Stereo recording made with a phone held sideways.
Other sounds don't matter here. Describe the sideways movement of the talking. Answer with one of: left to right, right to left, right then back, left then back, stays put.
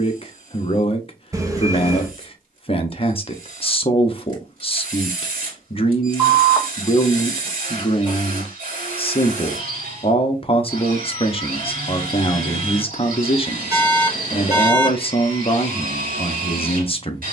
stays put.